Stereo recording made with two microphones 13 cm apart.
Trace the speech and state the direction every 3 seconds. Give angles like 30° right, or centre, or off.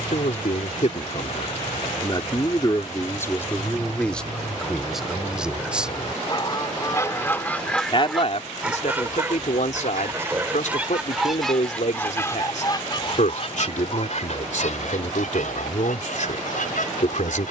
50° left, centre, 50° left, 70° left, 70° left, 70° left.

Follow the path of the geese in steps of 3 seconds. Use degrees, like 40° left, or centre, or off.
80° left, 60° left, 10° left, 10° right, 50° left, 80° left.